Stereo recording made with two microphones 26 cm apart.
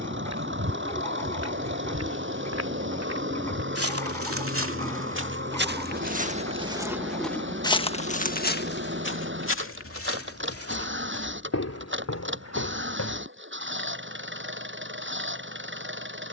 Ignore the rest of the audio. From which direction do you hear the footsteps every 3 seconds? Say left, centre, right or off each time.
right, right, centre, left, left, off.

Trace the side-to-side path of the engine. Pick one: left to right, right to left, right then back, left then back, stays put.
stays put.